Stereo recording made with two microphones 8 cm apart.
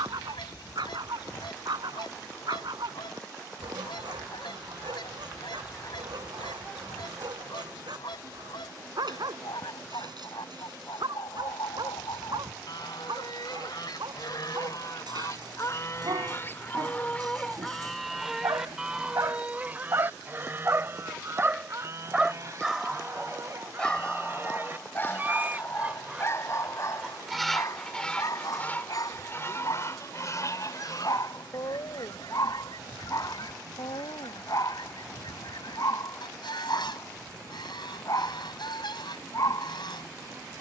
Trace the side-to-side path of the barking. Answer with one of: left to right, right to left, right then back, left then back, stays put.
right to left.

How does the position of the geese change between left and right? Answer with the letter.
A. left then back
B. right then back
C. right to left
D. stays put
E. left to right
B.